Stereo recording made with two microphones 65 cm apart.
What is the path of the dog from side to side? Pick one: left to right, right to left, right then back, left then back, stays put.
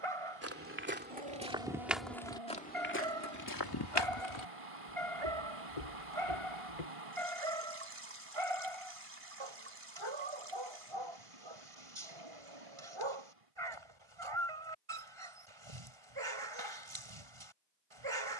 stays put.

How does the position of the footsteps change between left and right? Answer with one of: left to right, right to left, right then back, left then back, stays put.
right to left.